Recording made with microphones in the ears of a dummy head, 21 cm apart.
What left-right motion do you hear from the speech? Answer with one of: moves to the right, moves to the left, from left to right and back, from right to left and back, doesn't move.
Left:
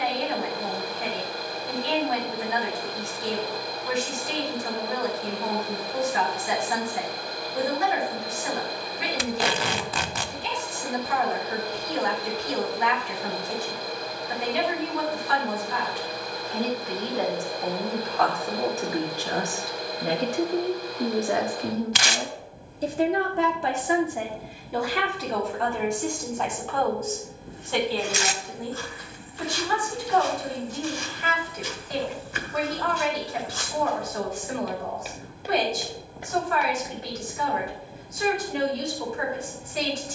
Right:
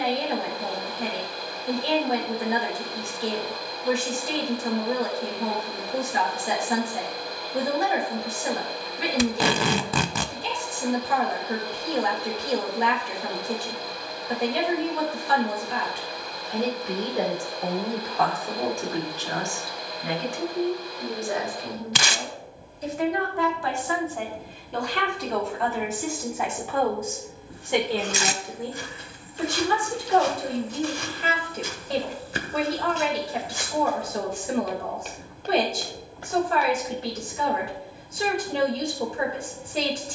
from right to left and back.